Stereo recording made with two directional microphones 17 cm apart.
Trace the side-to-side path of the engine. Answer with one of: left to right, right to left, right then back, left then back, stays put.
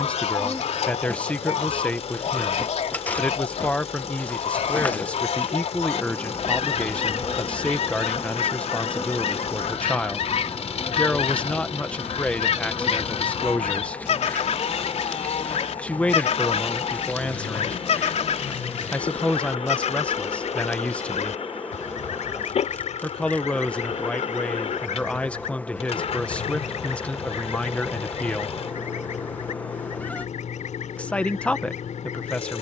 stays put.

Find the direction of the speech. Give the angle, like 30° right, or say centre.
10° left.